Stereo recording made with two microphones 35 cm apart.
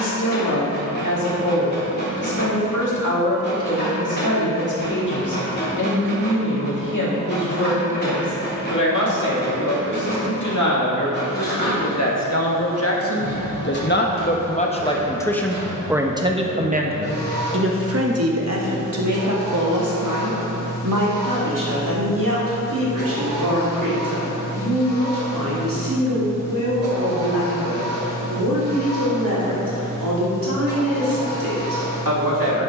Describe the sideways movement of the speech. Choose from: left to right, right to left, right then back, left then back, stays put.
left to right.